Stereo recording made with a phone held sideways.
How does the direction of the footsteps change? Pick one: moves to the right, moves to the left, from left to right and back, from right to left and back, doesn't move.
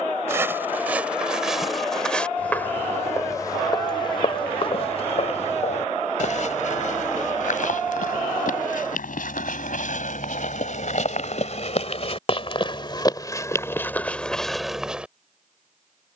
from right to left and back.